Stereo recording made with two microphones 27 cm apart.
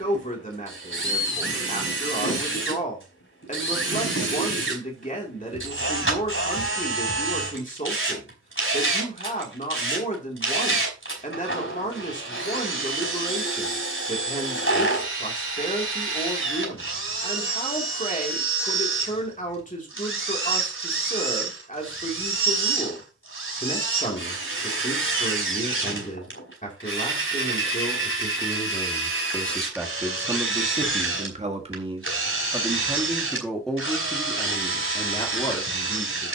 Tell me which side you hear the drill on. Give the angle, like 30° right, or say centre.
50° left.